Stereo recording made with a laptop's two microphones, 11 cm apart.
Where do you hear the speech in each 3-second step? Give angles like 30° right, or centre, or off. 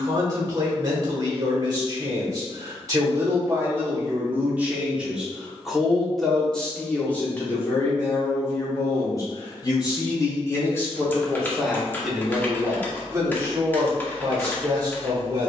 30° right, 20° right, 20° left, 20° left, 20° right.